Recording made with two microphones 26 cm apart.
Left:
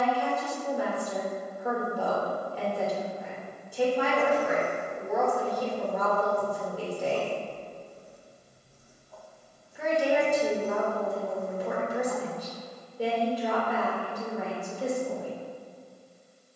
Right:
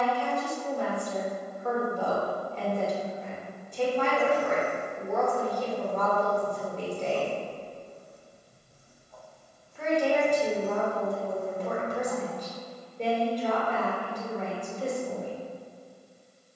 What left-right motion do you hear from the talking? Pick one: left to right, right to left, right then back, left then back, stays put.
stays put.